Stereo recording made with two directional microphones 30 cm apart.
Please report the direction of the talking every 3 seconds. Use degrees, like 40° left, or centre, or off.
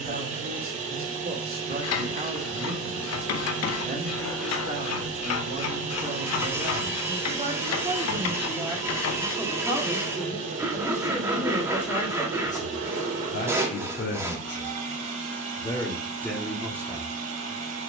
30° right, 30° right, 20° right, 10° left, 30° left, centre.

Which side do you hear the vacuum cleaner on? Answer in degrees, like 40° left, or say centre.
70° right.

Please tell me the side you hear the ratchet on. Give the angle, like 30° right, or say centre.
60° left.